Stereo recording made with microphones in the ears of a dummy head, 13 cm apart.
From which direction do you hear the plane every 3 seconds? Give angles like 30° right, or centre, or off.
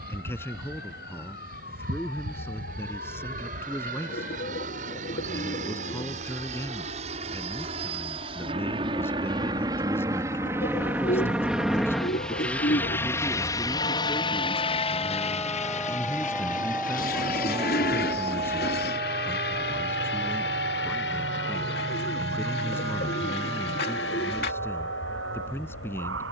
60° right, 50° right, 40° right, 20° right, 20° left, 50° left, 60° left, 70° left, 80° left.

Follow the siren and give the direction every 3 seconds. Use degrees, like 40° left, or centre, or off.
70° left, 70° left, 60° left, 60° left, 40° left, centre, 50° right, 70° right, 80° right.